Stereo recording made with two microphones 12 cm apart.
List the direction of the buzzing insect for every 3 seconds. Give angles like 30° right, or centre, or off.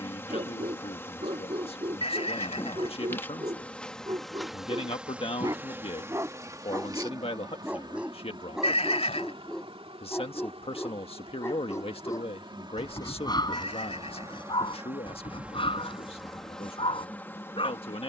20° left, centre, 30° right, 50° right, 30° right, centre.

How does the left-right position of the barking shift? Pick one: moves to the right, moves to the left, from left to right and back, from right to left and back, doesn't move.
moves to the left.